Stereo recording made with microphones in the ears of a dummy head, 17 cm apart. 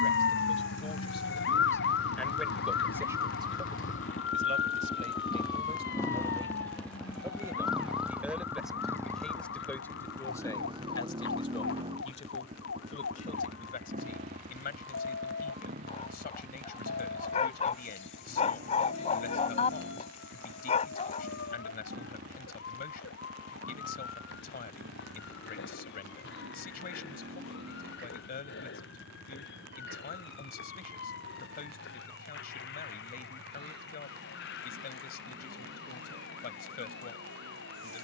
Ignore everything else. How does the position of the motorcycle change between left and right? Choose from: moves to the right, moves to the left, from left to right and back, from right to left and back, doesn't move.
moves to the right.